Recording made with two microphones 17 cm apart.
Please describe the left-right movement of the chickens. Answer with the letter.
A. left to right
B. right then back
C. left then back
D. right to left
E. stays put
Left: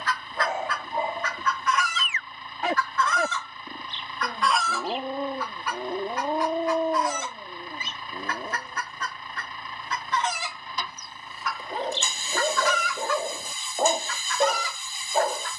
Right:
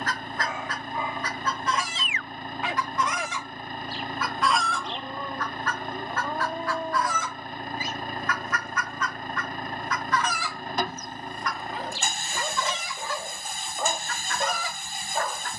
C.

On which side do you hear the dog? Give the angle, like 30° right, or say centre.
40° left.